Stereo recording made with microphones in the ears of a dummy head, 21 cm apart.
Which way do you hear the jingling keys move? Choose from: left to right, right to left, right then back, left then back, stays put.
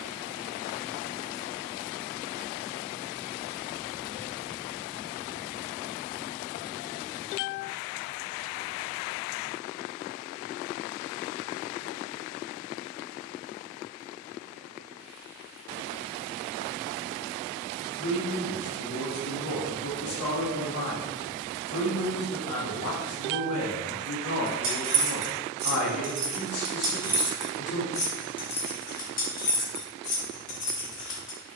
right to left.